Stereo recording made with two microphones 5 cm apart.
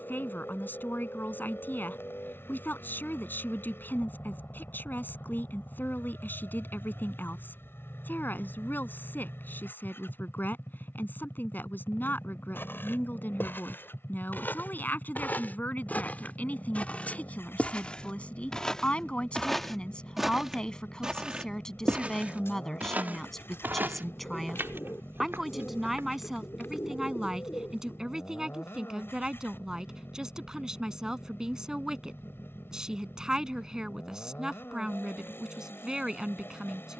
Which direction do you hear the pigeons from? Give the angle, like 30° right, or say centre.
60° left.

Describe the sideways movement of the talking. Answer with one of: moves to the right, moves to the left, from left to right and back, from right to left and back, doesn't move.
moves to the right.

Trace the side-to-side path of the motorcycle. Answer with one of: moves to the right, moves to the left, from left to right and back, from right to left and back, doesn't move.
doesn't move.